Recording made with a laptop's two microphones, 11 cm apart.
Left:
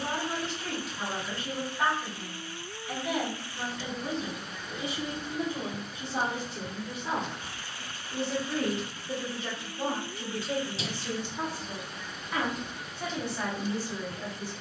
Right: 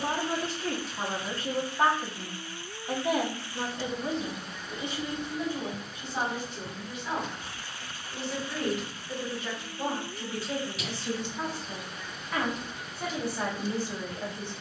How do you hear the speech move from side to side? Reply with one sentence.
In this clip you hear the speech move from right to left and back again.